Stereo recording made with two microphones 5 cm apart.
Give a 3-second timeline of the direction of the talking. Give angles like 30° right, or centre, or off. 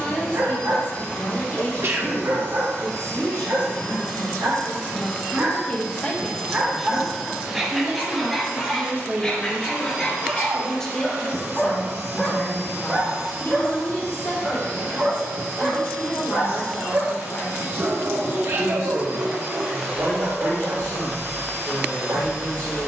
60° left, 50° left, 20° right, centre, 50° left, 60° left, 60° left, 60° left.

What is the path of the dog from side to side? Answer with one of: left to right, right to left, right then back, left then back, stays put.
left then back.